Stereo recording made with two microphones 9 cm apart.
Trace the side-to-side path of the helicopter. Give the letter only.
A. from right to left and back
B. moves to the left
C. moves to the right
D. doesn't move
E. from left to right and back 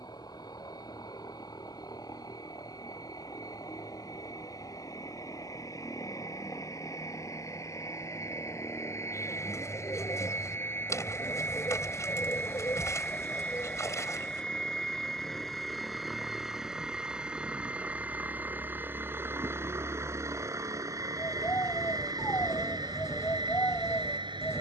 C.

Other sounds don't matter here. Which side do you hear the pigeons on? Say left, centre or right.
left.